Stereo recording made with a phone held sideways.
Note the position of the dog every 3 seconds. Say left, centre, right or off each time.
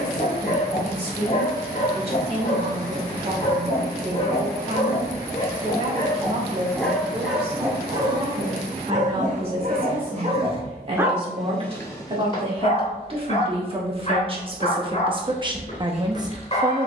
left, left, centre, right, left, left.